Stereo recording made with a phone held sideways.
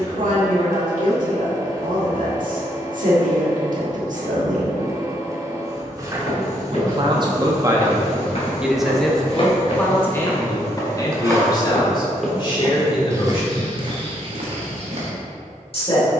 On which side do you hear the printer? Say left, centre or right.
right.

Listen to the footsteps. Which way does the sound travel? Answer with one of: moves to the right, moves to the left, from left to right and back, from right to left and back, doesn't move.
moves to the right.